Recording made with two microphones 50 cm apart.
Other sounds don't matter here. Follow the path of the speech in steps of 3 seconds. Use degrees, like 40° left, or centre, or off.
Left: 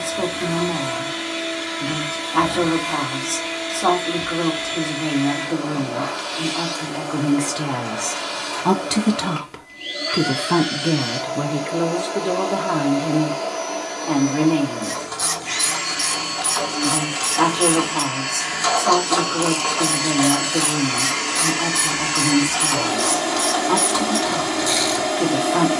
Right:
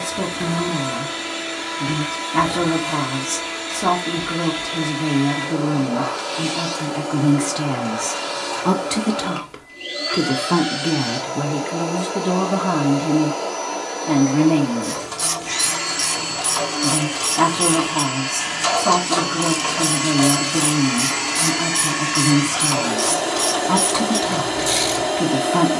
40° right, 40° right, 30° right, centre, 30° right, 40° right, 40° right, 40° right, 40° right.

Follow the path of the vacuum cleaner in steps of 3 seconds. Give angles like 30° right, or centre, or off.
60° right, 60° right, 60° right, 60° right, 60° right, 60° right, 40° right, 10° left, 20° left.